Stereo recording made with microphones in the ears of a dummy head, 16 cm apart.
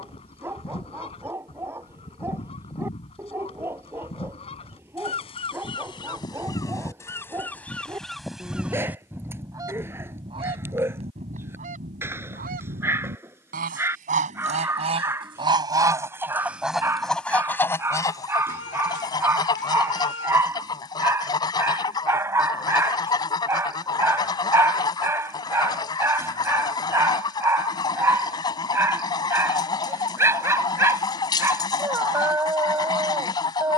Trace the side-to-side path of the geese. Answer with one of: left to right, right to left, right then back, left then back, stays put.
right then back.